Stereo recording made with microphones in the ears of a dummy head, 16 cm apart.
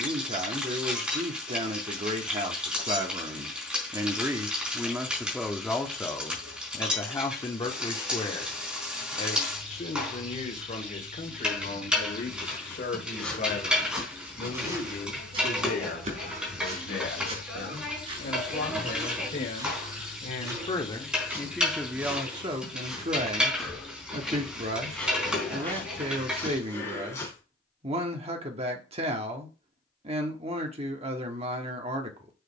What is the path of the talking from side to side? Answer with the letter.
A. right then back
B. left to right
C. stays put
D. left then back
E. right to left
D.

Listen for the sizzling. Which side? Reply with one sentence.
You can hear the sizzling in the centre.